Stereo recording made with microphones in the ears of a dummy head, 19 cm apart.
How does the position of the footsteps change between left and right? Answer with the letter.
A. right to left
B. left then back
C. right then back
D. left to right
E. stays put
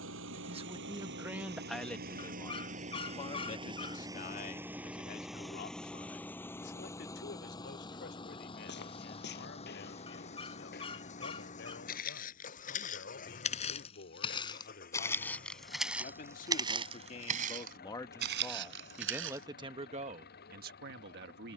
D.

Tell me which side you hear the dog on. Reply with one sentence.
In this clip you hear the dog on the left.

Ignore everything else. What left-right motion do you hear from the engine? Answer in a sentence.
In this clip you hear the engine go from the right side to the left.